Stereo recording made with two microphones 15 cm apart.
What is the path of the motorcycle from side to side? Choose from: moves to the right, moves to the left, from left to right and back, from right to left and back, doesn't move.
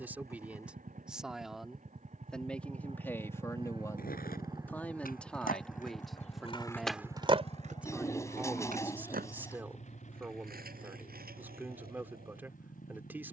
moves to the left.